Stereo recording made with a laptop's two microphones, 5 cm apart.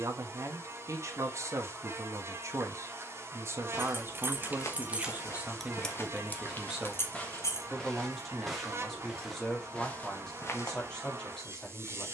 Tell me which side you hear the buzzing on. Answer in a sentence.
You can hear the buzzing on the right.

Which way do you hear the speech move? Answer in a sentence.
You can hear the speech move from right to left.